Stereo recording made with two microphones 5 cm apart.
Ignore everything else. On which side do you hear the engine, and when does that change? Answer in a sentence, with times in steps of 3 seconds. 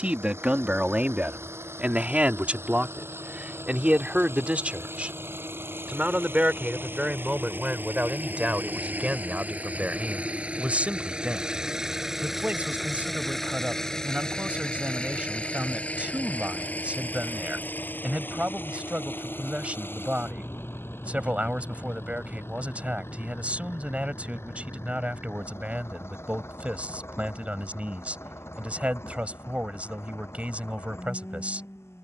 You can hear the engine on the right from 0 s, in the centre from 12 s and on the left from 15 s.